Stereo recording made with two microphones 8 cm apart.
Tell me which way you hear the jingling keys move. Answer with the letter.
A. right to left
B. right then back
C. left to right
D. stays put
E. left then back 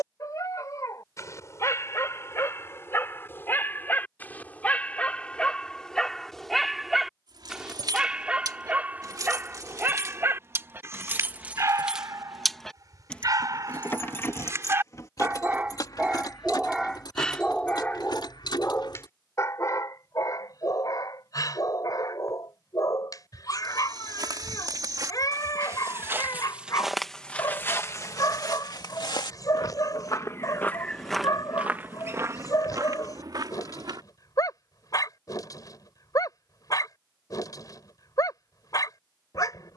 A.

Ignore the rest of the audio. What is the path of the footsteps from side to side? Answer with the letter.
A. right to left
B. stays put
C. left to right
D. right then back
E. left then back
E.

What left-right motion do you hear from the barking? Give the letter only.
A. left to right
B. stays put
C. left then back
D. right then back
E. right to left
D.